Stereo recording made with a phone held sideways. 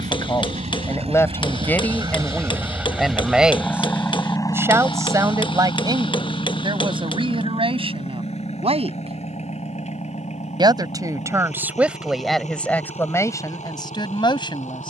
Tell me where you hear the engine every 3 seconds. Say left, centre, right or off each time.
right, left, left, left, left.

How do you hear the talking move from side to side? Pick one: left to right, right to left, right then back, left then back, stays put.
right then back.